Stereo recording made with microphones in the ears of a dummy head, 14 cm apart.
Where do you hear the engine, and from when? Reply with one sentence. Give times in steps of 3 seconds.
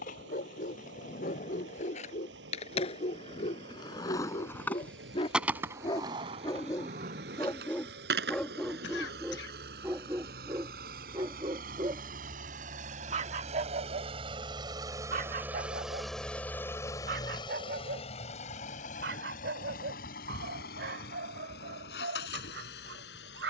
In this clip you hear the engine on the right from 0 s, in the centre from 15 s and on the left from 18 s.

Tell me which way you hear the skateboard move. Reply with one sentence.
In this clip you hear the skateboard move from left to right.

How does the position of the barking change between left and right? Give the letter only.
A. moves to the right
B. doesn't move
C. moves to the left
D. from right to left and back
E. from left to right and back
A.